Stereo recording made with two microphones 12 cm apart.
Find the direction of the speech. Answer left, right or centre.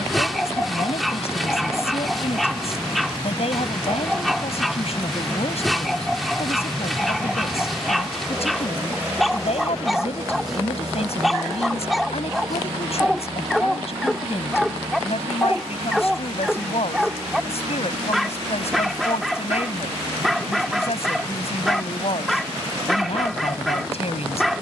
left.